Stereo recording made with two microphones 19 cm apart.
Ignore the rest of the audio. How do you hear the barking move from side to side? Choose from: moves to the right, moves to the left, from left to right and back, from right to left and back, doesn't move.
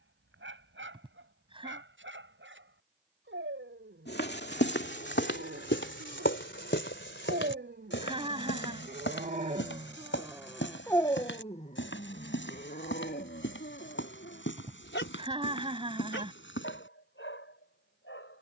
moves to the left.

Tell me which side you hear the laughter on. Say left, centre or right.
right.